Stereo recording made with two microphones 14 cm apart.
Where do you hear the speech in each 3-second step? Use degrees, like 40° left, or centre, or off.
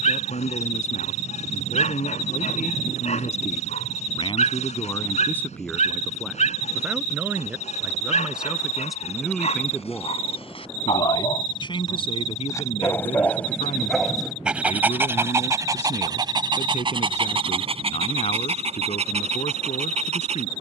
70° left, 30° left, 10° right, 20° left, 50° left, 60° left, 60° left.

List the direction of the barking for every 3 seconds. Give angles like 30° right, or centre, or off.
60° left, 60° left, 60° left, 50° left, centre, 40° right, 60° right.